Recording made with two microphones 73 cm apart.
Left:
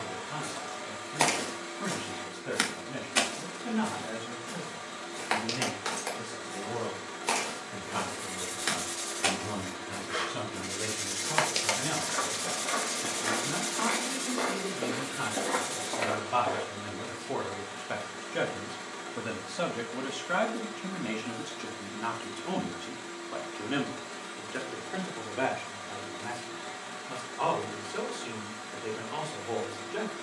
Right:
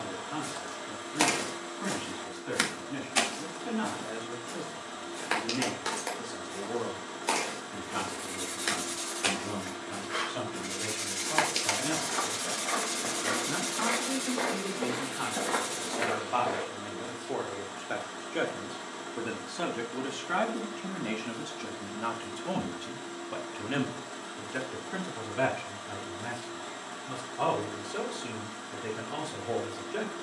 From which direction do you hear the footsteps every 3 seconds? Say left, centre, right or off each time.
right, left, left, left, centre, right, off, off, off, off.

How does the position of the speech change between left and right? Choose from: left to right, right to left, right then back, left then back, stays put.
left to right.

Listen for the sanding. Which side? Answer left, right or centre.
left.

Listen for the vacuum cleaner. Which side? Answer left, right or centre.
left.